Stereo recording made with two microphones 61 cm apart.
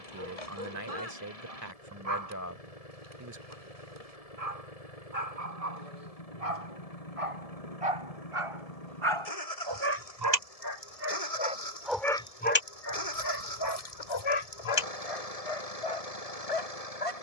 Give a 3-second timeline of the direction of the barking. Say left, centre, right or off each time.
right, right, right, right, left, left.